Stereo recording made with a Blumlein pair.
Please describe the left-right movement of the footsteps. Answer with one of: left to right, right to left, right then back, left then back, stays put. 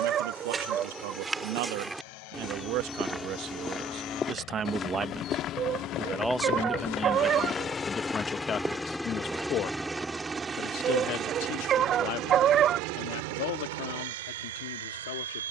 left then back.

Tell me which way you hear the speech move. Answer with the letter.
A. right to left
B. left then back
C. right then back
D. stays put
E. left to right
A.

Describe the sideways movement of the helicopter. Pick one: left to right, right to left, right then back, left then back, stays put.
left to right.